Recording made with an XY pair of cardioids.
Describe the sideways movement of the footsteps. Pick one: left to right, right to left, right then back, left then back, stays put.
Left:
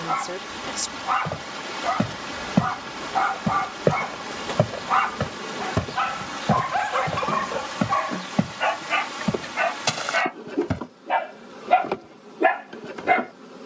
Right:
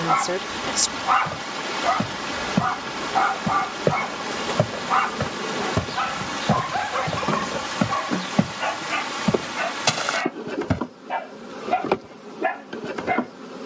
left to right.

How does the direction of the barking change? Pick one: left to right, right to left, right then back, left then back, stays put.
right to left.